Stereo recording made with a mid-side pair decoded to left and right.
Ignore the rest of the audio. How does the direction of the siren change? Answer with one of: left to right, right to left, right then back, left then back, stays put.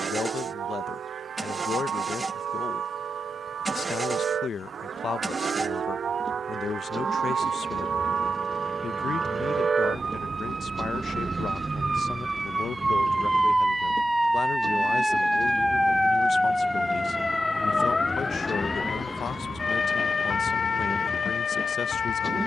right to left.